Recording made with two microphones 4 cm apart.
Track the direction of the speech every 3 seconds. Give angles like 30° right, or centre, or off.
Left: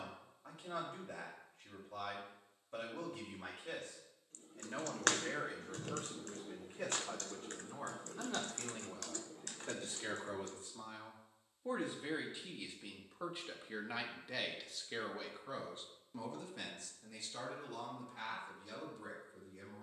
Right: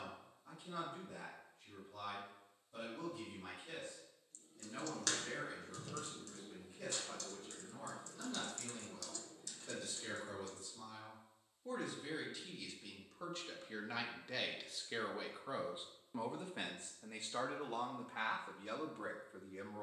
60° left, 60° left, 50° left, 40° left, 10° left, 30° right, 50° right.